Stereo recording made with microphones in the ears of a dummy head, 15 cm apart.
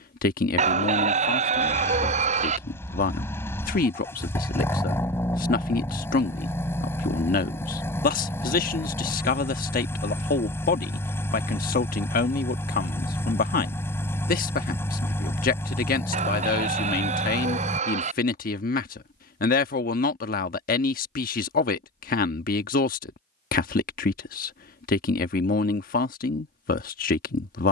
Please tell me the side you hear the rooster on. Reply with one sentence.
In this clip you hear the rooster on the right.